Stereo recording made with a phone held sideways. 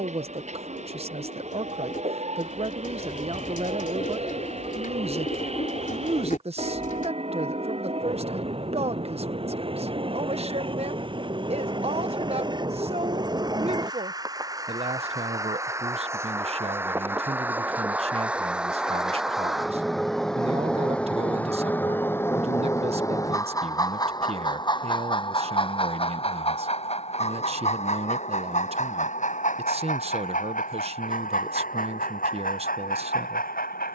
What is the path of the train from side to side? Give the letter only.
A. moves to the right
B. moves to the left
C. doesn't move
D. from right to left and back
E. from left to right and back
B.